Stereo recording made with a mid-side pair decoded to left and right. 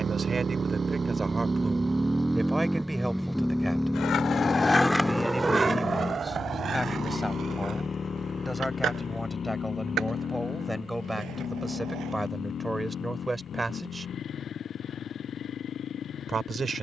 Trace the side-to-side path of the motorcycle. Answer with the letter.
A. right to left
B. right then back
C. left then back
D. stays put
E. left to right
A.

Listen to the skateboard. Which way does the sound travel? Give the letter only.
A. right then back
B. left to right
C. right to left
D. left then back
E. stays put
B.